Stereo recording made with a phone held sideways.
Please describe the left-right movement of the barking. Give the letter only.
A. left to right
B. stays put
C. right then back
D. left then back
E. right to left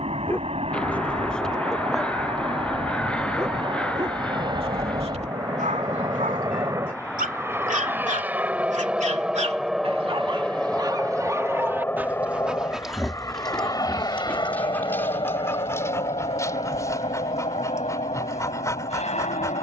C.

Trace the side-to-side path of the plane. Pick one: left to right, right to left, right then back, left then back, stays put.
right to left.